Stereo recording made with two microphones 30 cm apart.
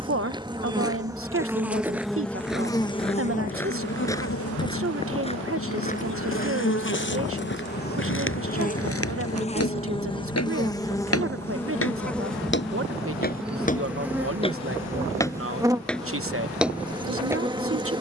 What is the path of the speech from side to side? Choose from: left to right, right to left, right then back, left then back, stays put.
stays put.